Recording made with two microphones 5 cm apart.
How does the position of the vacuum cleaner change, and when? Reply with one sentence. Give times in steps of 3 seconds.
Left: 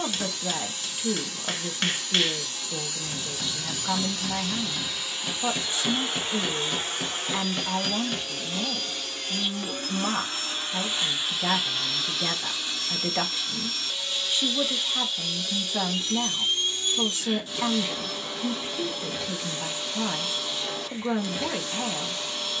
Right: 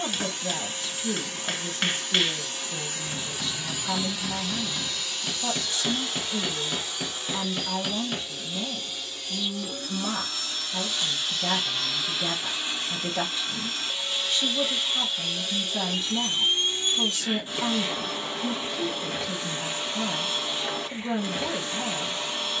You can hear the vacuum cleaner on the right from 0 s, in the centre from 3 s, on the left from 6 s and on the right from 12 s.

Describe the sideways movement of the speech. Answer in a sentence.
In this clip you hear the speech stay put.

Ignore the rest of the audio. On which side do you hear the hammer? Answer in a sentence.
You can hear the hammer in the centre.